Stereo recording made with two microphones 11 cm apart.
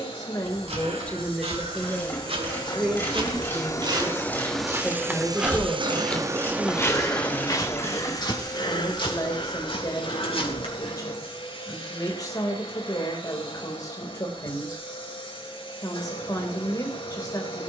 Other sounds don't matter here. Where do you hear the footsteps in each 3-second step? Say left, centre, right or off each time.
right, right, left, left, off, off.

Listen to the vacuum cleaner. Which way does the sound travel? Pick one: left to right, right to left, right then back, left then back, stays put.
right then back.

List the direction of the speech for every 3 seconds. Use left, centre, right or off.
centre, centre, left, left, left, left.